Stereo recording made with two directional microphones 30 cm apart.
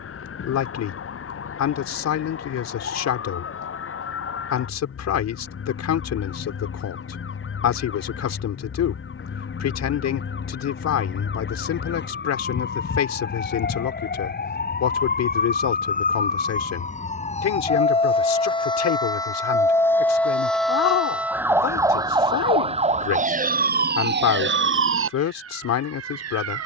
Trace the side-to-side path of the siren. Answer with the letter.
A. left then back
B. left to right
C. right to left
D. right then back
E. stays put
B.